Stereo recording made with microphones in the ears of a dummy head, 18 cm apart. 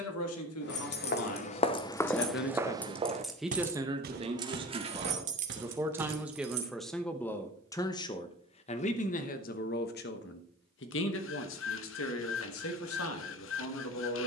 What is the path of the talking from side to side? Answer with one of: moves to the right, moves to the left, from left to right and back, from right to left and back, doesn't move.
from left to right and back.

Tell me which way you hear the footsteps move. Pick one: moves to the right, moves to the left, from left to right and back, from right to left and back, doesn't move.
moves to the right.